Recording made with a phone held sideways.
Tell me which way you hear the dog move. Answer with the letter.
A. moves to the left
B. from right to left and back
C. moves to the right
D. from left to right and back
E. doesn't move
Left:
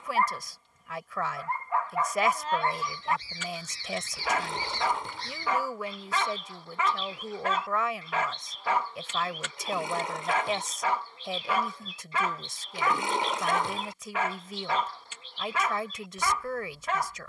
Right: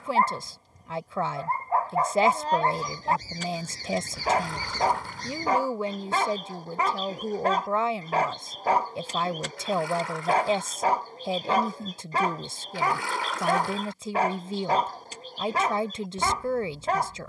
E.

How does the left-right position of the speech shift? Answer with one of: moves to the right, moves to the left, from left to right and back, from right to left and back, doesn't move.
doesn't move.